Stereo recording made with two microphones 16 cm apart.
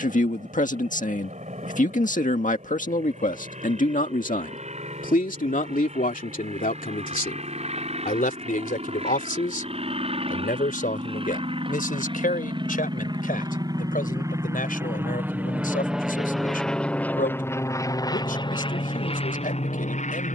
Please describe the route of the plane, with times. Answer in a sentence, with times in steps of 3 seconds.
In this clip you hear the plane on the right from 0 s, in the centre from 15 s and on the left from 18 s.